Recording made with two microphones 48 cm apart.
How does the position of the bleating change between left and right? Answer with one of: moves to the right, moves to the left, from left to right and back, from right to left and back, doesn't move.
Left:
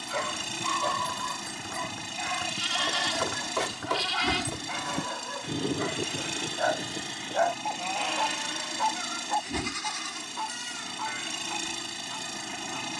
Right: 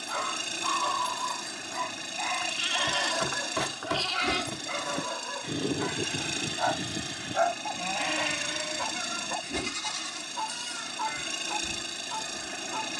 moves to the right.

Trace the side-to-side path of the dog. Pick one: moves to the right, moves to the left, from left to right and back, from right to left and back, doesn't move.
moves to the right.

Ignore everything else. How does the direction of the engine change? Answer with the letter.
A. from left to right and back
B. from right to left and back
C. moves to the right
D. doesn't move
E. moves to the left
D.